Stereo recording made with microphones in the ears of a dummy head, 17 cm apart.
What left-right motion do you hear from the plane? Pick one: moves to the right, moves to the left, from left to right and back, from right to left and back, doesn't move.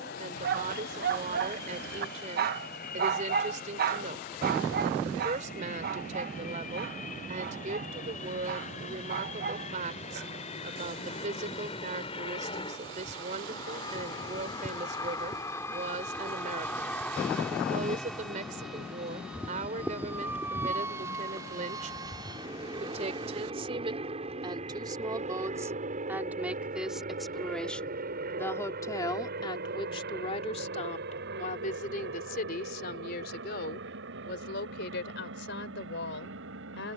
moves to the right.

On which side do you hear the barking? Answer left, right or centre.
right.